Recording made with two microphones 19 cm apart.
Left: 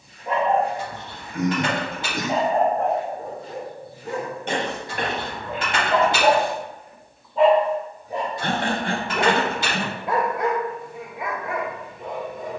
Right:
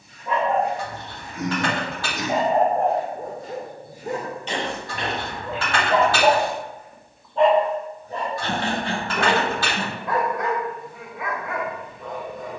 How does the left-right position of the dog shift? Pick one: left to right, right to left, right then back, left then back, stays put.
right then back.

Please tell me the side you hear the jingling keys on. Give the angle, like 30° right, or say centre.
20° left.